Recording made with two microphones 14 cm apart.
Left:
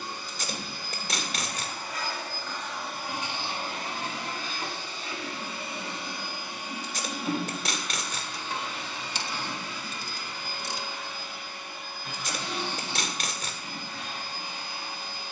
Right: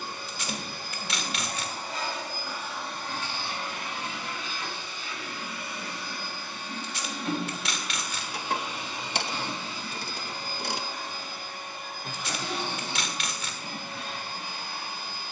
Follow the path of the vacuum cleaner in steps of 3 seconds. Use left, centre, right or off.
right, left, centre, right, right.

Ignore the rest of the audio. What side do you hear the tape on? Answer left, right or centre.
left.